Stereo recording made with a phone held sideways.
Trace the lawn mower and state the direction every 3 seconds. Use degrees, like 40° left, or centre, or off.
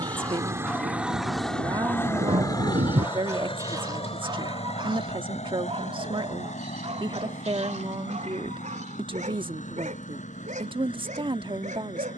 centre, 60° left, 70° left, 80° left.